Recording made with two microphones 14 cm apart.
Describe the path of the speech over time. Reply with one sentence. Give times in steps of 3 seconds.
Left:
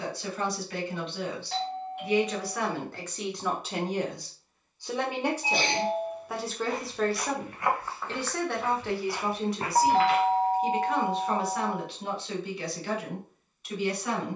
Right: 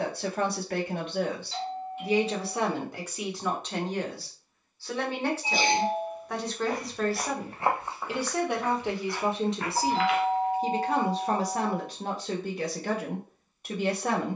In this clip you hear the speech on the right from 0 s, in the centre from 3 s and on the right from 9 s.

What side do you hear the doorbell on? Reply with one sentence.
In this clip you hear the doorbell on the left.